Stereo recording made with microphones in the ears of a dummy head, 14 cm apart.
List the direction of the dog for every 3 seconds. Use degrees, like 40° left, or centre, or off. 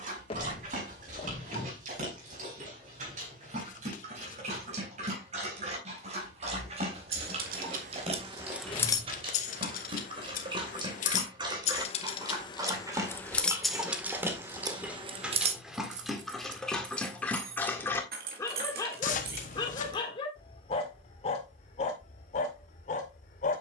50° right, 50° right, 40° right, 30° right, 20° right, centre, 30° left, 50° left.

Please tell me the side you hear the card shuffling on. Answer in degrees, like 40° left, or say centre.
50° left.